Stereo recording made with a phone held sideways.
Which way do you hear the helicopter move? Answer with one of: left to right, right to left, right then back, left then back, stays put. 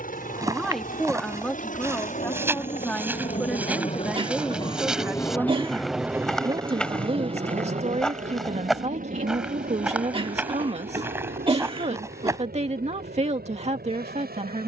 left to right.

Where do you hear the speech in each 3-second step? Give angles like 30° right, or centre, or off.
10° left, centre, 40° right, 50° right, 50° right.